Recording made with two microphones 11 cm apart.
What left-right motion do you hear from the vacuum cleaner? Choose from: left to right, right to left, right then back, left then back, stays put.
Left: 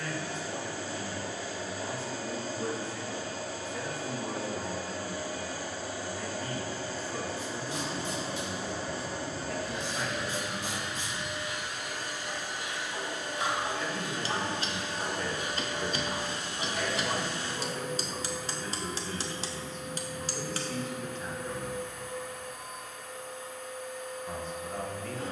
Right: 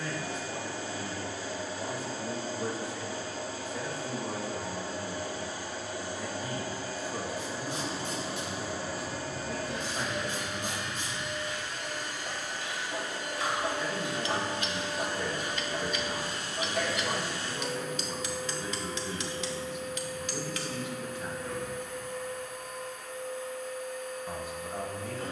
right to left.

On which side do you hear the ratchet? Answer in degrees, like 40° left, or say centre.
80° right.